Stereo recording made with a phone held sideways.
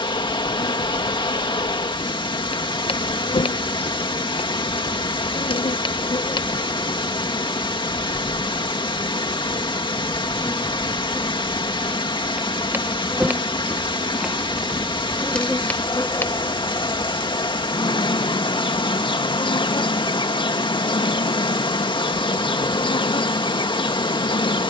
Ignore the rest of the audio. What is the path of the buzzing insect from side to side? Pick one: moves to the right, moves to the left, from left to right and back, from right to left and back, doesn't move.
from left to right and back.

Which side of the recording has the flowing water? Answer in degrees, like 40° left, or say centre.
40° left.